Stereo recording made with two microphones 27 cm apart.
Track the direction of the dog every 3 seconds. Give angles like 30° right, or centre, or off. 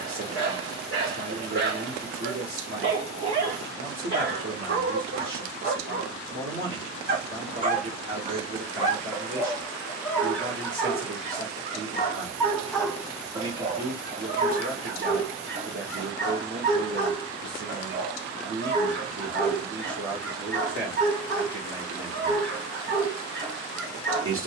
50° right, 40° right, 20° right, 10° left, 20° right, 40° right, 40° right, 40° right.